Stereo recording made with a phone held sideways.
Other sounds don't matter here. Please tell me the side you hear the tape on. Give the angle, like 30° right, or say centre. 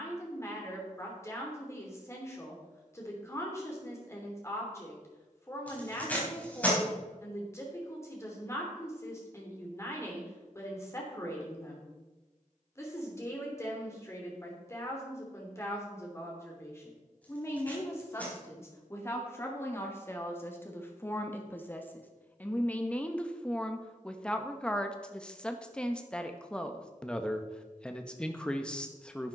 10° left.